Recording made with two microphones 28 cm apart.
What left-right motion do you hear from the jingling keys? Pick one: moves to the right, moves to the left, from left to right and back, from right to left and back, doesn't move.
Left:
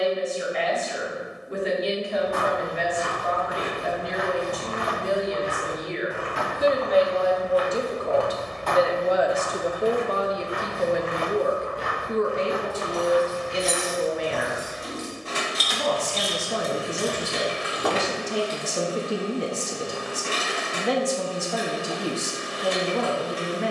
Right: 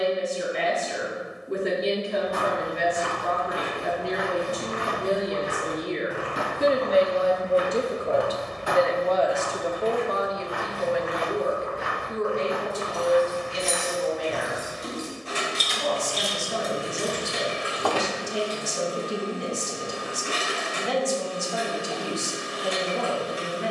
moves to the left.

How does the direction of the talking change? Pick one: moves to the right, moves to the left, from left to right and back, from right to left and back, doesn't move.
moves to the left.